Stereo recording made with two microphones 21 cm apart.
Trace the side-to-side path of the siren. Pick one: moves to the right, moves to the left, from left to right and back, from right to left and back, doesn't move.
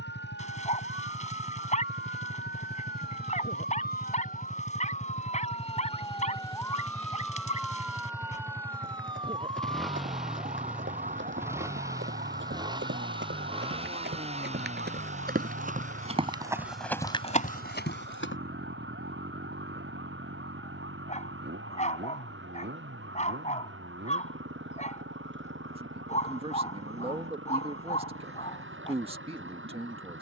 moves to the right.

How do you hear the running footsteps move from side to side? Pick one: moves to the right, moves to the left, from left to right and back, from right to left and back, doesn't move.
moves to the left.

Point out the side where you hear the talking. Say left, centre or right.
right.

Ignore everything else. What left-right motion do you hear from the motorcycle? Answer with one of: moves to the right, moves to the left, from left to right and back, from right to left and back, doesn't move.
moves to the right.